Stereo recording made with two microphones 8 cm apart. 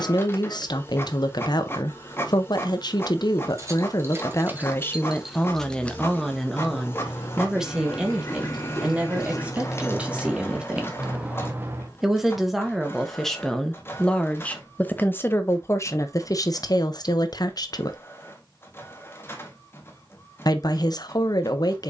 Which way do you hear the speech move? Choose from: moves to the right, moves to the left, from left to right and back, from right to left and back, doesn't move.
from left to right and back.